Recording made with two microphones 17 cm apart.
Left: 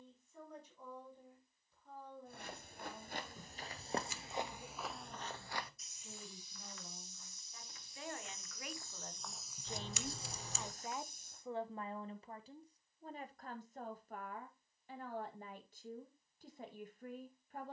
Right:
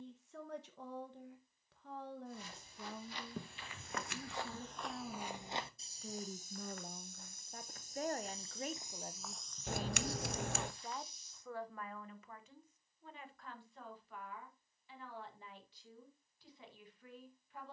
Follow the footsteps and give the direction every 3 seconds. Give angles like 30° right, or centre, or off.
50° left, 10° left, 40° right, 30° left, off, off.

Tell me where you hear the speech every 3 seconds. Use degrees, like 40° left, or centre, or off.
80° right, 80° right, 60° right, centre, 40° left, 50° left.